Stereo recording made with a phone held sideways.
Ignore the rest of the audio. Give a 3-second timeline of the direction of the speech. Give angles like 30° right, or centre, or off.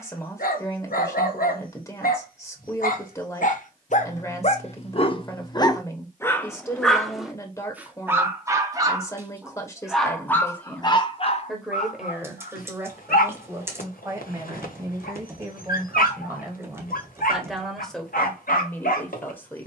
20° left, 20° left, 20° left, 10° left, 20° right, 10° right, 10° left.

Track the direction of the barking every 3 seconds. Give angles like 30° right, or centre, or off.
70° left, 40° left, 10° right, 20° left, 70° left, 70° left, 70° left.